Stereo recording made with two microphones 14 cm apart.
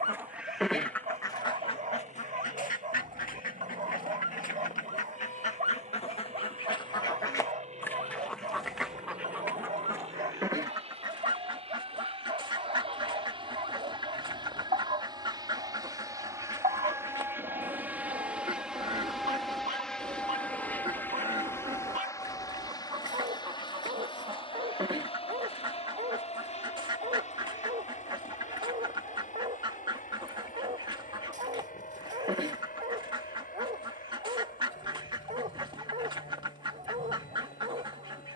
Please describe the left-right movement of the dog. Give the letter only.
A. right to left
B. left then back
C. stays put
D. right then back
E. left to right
C.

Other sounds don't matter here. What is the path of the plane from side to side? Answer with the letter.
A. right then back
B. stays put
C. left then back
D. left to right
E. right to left
E.